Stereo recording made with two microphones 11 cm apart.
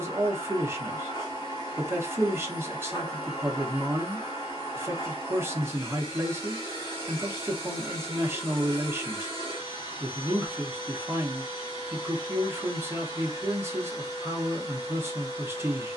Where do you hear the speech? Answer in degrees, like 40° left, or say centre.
20° right.